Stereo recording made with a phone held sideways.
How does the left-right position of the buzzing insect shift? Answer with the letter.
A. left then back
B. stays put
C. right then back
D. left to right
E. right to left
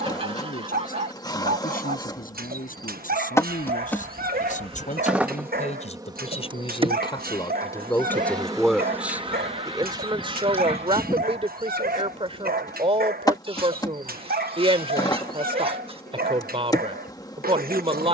C.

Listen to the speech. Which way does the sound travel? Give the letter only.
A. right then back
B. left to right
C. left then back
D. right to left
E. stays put
B.